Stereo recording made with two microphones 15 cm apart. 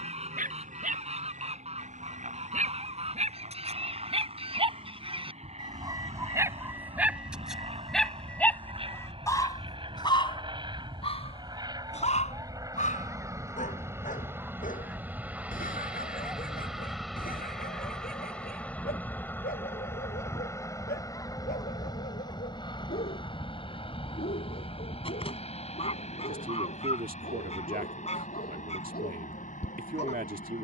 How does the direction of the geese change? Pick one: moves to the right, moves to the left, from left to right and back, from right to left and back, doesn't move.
moves to the left.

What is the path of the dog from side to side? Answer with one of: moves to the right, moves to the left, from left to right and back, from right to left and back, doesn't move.
moves to the left.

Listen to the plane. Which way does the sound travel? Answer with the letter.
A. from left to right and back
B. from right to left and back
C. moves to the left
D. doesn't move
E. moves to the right
C.